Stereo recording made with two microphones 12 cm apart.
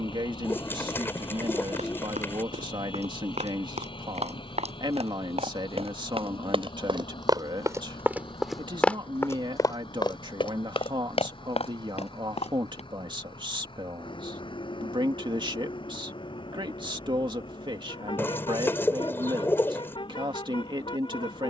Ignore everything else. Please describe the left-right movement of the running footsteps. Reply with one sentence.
In this clip you hear the running footsteps move from right to left.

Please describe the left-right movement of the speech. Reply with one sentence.
In this clip you hear the speech stay put.